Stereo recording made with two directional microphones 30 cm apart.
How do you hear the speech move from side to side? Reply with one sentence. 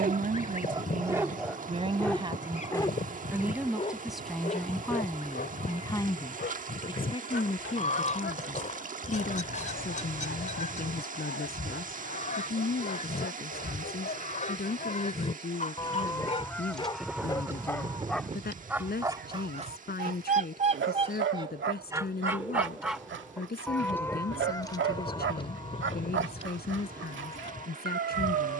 In this clip you hear the speech travel towards the left.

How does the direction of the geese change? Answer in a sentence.
In this clip you hear the geese move from left to right and back again.